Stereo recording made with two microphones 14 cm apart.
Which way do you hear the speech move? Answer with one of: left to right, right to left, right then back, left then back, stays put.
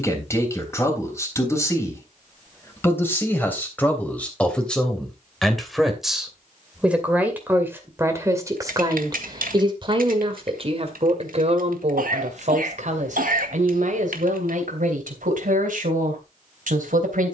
left to right.